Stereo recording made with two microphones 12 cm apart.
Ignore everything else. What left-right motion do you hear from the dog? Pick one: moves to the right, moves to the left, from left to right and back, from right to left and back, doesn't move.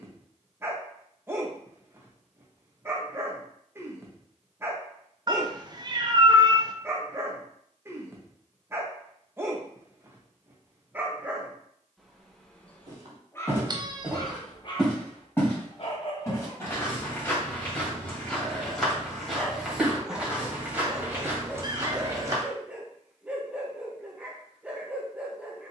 from right to left and back.